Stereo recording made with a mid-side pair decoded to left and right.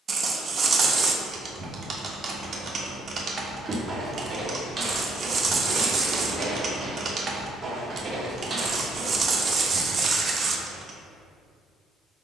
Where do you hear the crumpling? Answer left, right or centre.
right.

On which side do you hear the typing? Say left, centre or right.
right.